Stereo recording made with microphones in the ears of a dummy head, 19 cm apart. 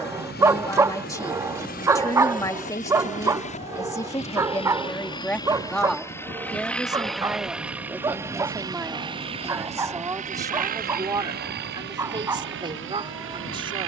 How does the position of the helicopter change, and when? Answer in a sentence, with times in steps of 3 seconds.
You can hear the helicopter on the left from 0 s, in the centre from 6 s and on the right from 9 s.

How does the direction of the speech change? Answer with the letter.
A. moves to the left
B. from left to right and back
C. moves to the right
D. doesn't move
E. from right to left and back
C.